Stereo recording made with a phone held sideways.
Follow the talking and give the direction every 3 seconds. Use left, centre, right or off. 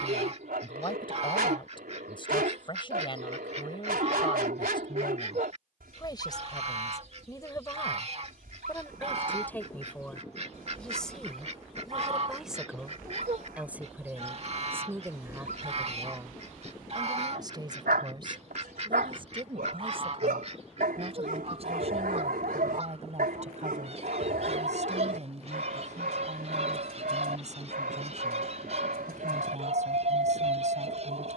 left, left, left, centre, centre, right, right, right, right, right, right.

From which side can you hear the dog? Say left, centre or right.
right.